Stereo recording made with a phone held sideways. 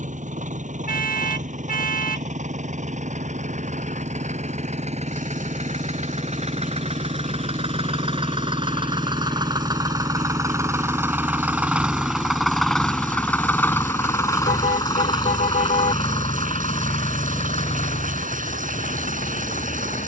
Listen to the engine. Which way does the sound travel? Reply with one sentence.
In this clip you hear the engine travel towards the left.